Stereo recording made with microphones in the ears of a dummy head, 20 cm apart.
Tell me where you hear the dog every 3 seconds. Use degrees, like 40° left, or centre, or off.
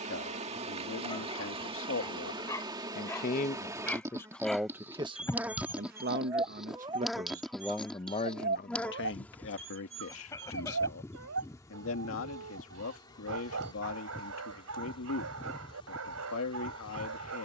20° left, centre, 30° right, 70° right, 70° right, 70° right.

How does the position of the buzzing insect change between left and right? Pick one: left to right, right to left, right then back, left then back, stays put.
right to left.